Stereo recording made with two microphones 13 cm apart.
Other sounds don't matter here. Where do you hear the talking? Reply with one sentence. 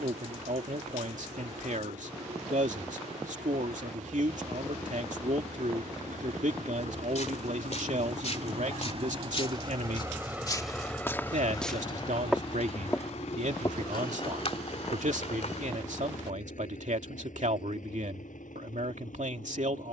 You can hear the talking on the right.